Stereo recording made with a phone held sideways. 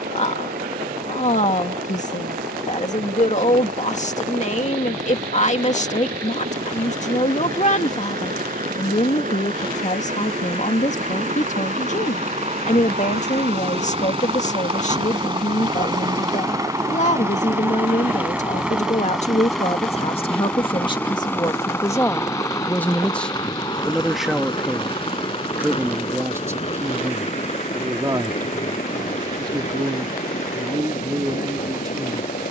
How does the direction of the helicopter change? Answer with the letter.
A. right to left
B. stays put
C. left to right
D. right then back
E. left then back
A.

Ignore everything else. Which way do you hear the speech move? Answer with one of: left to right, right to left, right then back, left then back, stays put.
left to right.